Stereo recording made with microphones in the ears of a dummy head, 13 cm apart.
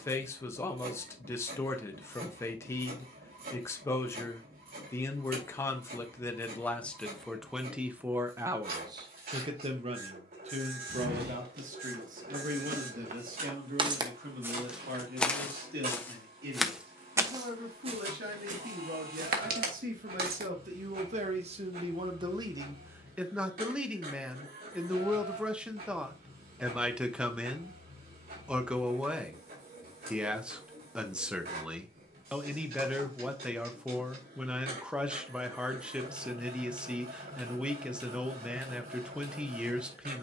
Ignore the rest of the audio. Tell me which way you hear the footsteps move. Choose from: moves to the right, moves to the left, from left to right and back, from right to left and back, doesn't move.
from right to left and back.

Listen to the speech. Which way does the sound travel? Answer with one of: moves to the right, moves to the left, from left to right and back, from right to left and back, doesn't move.
from left to right and back.